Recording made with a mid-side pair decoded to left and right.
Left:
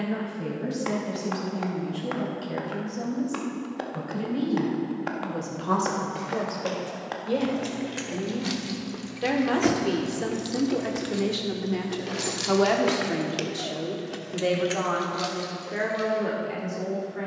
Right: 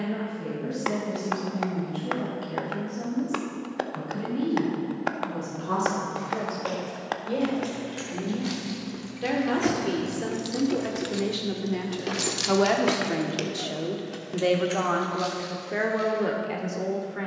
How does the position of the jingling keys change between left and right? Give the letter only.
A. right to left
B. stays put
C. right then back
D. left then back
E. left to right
C.